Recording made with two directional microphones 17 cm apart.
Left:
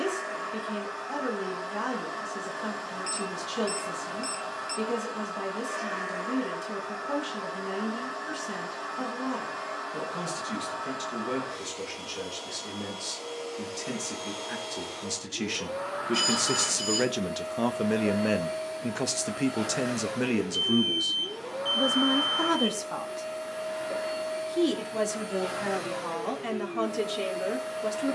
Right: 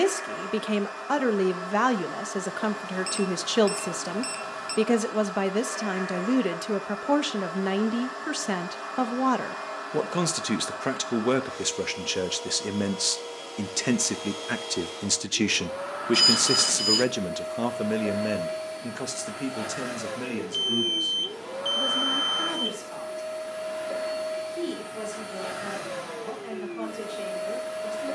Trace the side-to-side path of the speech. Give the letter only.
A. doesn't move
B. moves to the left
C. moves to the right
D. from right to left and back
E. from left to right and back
B.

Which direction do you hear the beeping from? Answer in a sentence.
You can hear the beeping on the right.